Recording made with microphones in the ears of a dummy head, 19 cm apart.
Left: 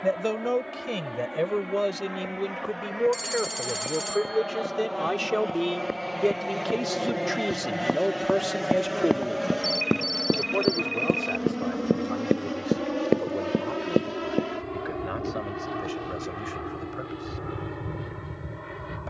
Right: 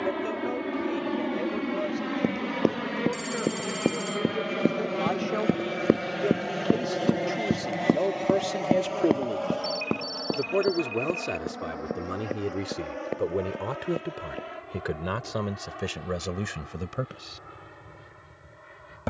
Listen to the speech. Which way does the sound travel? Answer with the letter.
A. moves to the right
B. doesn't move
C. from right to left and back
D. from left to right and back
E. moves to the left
A.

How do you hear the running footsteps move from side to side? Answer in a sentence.
In this clip you hear the running footsteps move to the left.